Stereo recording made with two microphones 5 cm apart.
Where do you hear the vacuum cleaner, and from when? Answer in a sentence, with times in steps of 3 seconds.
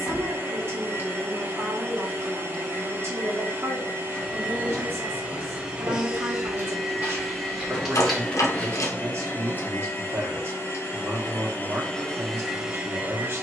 You can hear the vacuum cleaner on the right from 0 s, in the centre from 6 s, on the left from 9 s and in the centre from 12 s.